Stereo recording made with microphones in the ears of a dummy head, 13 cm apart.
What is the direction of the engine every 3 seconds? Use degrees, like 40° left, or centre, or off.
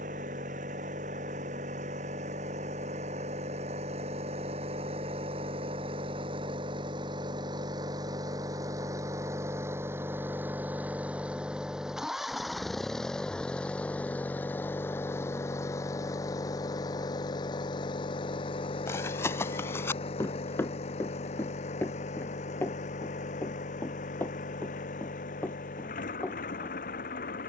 50° right, 40° right, 30° right, 10° right, 10° left, 20° left, 40° left, 50° left, 60° left.